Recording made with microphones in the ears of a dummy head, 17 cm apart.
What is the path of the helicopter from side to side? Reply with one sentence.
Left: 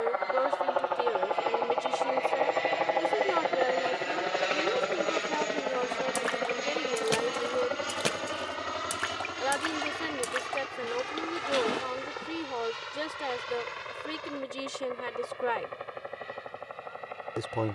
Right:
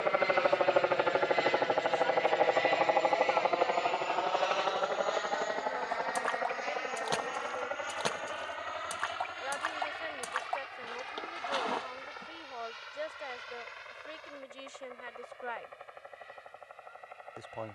In this clip you hear the helicopter move from right to left.